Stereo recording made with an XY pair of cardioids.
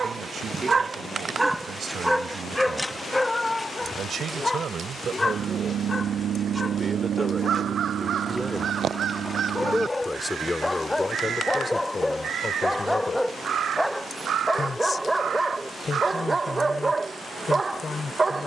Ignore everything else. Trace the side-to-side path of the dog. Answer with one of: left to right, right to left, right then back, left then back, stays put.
left then back.